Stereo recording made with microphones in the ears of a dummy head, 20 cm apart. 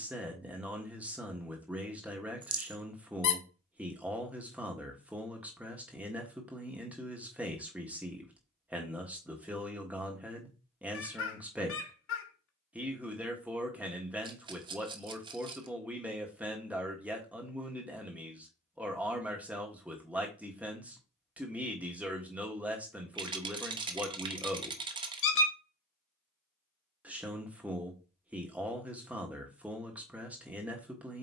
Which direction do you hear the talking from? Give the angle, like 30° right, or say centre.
10° right.